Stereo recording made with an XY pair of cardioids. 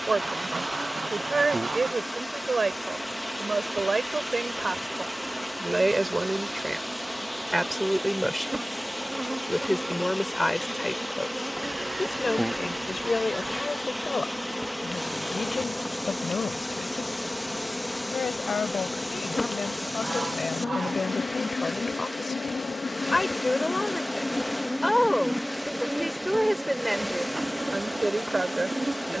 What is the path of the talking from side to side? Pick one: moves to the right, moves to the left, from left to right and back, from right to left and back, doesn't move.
from right to left and back.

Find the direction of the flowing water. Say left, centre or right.
centre.